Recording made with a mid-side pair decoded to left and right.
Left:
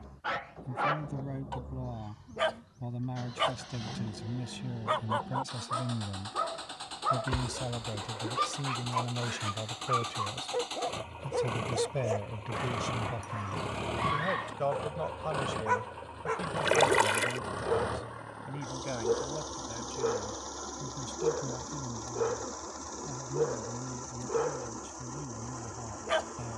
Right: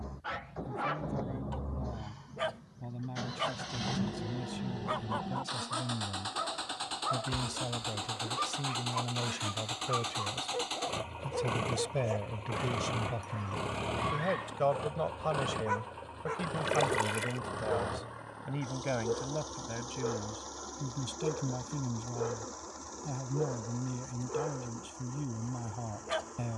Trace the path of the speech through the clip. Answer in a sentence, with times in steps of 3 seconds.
You can hear the speech on the left from 0 s, in the centre from 9 s and on the right from 15 s.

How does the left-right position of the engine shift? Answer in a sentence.
You can hear the engine move to the left.